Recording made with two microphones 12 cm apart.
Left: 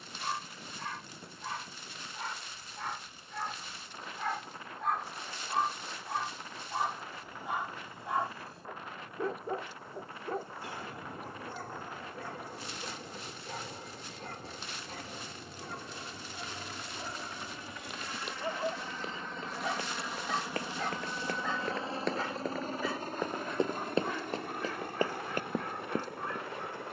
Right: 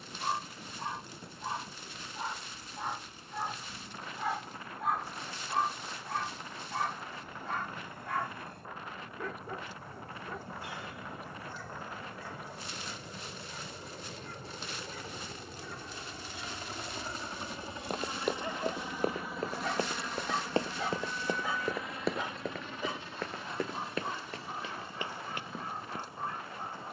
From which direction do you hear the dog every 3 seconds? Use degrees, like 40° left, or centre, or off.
20° right, 10° right, 10° left, 50° left, 60° left, 40° left, 10° left, 20° right, 30° right.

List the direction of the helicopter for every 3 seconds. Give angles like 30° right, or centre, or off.
70° right, 70° right, 70° right, 60° right, 60° right, 40° right, centre, 40° left, 60° left.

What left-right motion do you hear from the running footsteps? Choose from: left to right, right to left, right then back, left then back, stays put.
right to left.